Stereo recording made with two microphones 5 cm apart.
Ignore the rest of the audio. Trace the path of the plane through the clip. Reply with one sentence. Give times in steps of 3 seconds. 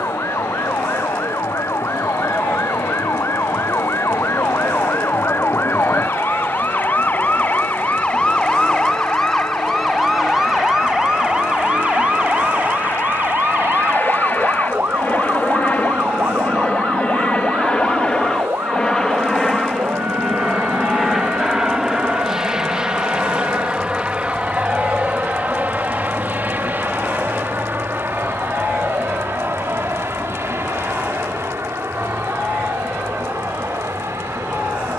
You can hear the plane on the left from 0 s, in the centre from 18 s and on the right from 24 s.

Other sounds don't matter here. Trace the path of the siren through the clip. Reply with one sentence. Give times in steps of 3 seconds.
You can hear the siren on the left from 0 s, in the centre from 9 s and on the right from 12 s.